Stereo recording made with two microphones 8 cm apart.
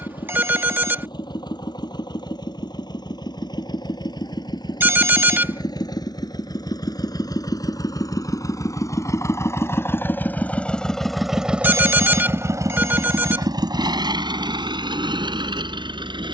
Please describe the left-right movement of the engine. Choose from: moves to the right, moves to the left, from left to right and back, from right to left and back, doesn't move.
moves to the right.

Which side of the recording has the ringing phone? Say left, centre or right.
right.